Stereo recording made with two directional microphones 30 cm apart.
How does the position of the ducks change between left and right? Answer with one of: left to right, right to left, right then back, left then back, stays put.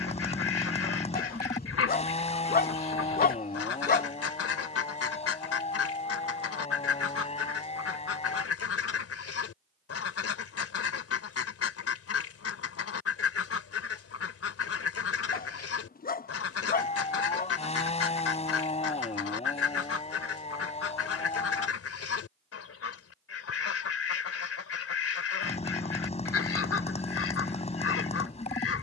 stays put.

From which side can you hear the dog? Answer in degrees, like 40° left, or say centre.
30° left.